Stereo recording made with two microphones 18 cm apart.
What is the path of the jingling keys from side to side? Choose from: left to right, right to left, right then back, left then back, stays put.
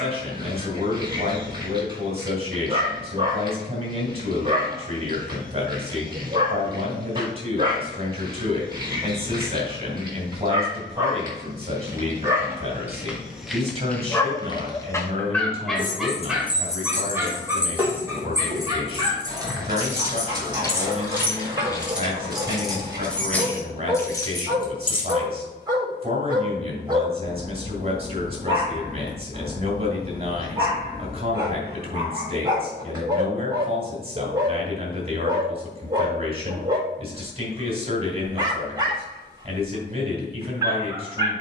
right then back.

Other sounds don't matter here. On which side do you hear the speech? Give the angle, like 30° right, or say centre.
40° right.